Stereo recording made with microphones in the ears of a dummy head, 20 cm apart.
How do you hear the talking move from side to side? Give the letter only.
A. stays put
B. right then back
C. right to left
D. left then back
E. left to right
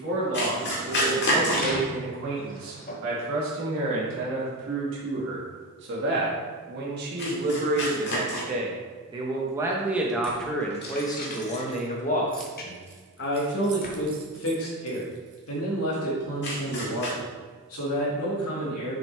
C.